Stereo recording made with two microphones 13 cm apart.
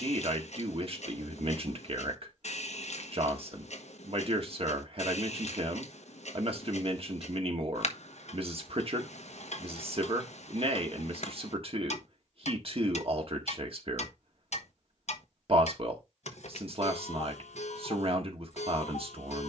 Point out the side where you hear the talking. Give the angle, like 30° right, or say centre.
50° right.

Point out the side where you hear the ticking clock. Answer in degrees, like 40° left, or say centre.
60° left.